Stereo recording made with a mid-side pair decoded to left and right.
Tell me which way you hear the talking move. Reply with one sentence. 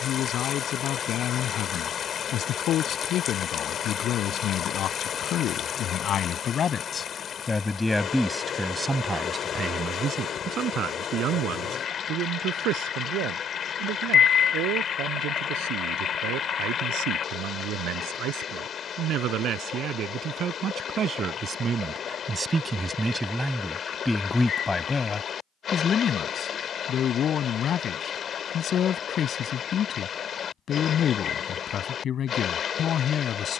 In this clip you hear the talking move from left to right and back again.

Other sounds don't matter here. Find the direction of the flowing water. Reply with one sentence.
In this clip you hear the flowing water on the left.